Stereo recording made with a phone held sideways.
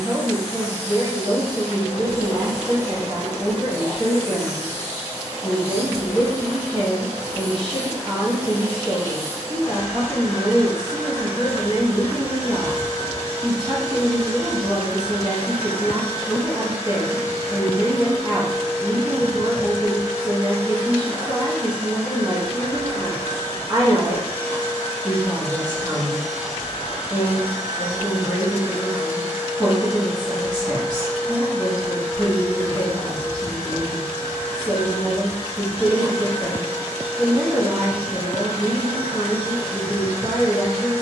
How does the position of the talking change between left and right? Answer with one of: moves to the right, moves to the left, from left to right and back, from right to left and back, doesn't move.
doesn't move.